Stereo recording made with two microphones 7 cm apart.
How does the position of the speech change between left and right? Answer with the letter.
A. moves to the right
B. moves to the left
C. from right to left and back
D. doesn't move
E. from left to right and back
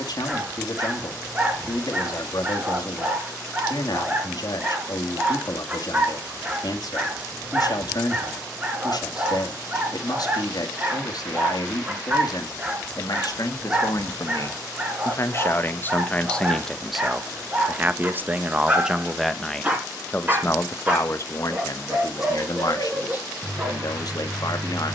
E.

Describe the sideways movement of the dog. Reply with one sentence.
In this clip you hear the dog stay in one place.